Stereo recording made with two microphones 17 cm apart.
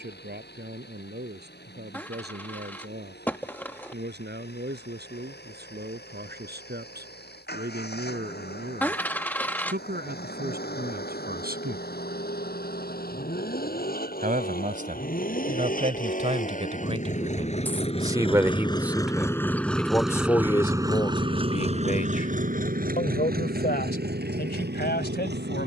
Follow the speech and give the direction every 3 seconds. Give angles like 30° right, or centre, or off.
70° right, 70° right, 70° right, 60° right, 50° right, 40° right, centre, 50° left, 70° left.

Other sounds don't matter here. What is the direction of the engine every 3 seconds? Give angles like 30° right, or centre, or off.
70° left, 70° left, 70° left, 70° left, 60° left, 50° left, 10° left, 50° right, 70° right.